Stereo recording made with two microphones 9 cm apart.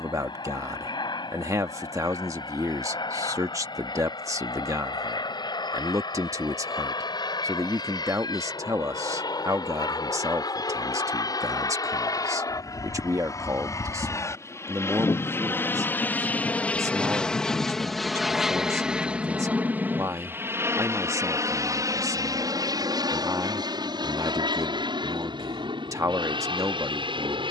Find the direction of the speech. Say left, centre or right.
right.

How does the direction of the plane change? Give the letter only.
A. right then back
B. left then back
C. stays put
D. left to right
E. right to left
D.